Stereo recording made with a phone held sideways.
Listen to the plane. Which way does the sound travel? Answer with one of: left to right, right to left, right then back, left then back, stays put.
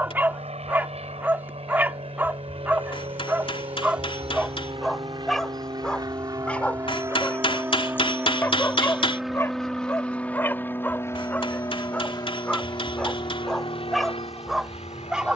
right to left.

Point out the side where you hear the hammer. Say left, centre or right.
left.